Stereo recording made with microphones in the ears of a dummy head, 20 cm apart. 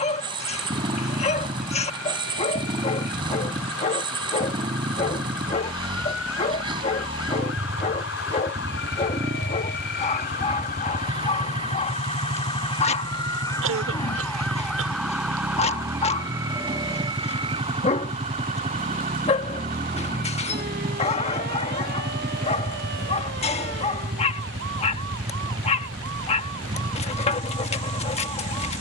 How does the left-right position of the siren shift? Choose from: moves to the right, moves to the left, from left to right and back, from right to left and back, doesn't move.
moves to the right.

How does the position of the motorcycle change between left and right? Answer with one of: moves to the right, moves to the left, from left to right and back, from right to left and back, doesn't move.
doesn't move.